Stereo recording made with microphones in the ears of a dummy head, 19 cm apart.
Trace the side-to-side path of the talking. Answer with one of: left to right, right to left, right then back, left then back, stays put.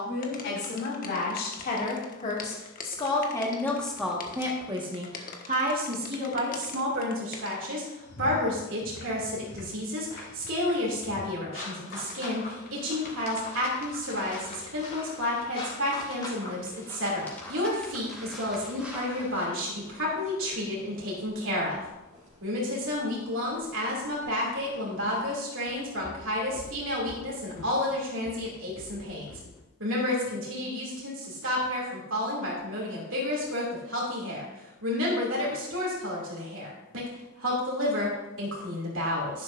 left to right.